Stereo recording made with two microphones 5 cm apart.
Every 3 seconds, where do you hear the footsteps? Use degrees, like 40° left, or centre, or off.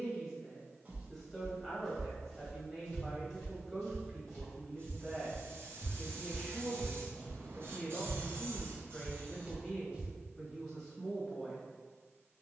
centre, 20° left, 10° left, 20° right.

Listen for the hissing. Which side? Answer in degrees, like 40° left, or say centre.
50° right.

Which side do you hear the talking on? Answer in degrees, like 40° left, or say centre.
10° left.